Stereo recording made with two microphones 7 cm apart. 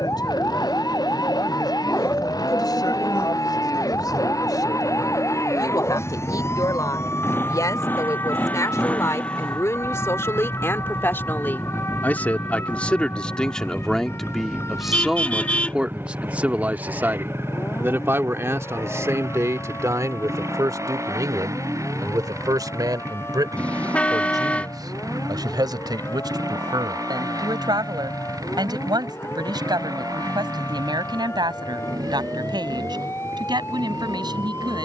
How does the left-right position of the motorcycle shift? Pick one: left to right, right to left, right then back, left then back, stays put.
left to right.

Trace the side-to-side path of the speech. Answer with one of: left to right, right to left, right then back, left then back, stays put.
left to right.